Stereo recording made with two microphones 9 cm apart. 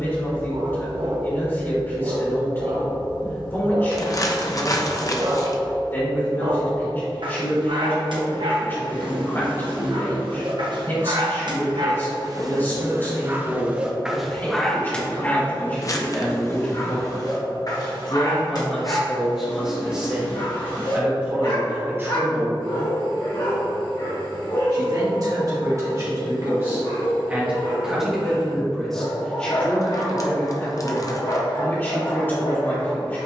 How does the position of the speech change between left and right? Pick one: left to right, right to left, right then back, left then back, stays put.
right then back.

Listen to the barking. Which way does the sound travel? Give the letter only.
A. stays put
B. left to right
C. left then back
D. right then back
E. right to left
E.